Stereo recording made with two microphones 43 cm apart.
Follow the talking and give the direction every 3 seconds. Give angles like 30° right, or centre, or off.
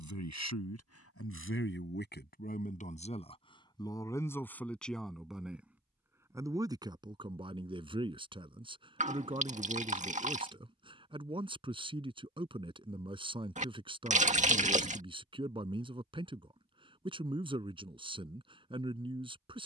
30° left, centre, 10° right, 10° right, 10° right, 10° right, 10° right.